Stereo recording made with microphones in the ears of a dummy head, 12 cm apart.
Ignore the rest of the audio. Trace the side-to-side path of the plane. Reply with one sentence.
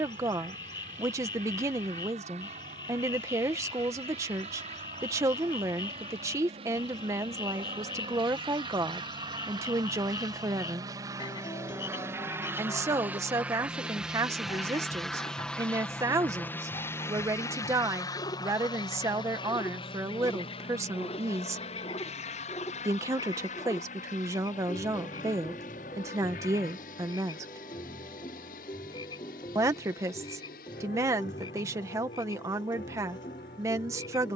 You can hear the plane move from right to left.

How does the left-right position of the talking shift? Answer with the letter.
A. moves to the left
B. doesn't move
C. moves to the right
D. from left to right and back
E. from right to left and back
B.